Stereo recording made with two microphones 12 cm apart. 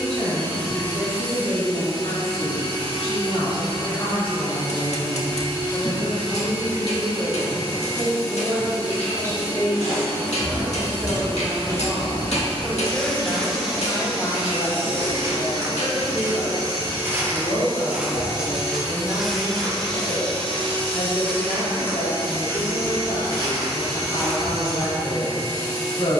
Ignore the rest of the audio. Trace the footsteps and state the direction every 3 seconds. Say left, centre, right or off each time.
off, off, off, left, centre, right, centre, left, left.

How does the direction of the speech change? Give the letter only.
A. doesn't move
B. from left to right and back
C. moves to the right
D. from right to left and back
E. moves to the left
B.